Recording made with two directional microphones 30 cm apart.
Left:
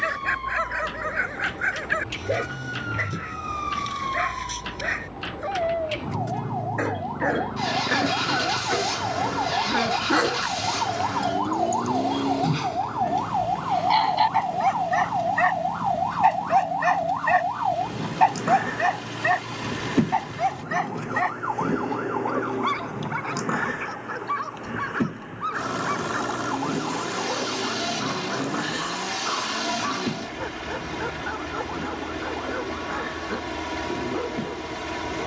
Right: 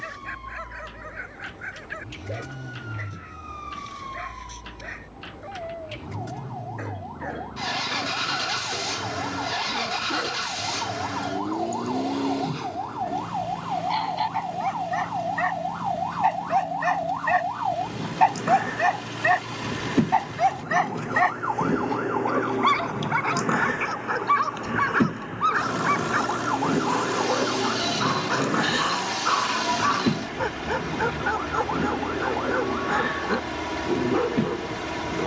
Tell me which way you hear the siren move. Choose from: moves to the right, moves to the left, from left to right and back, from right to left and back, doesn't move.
moves to the right.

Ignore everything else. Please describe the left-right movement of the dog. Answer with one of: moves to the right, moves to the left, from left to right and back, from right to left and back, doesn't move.
moves to the right.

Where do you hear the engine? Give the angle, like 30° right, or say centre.
centre.